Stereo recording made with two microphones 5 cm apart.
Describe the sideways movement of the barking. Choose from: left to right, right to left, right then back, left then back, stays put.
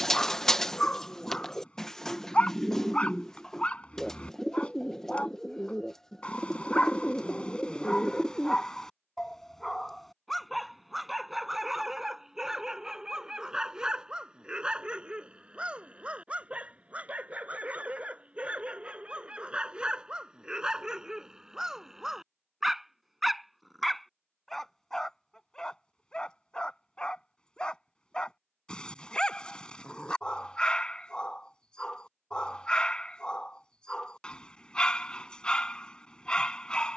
right then back.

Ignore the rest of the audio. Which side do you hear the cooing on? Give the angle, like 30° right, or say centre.
10° left.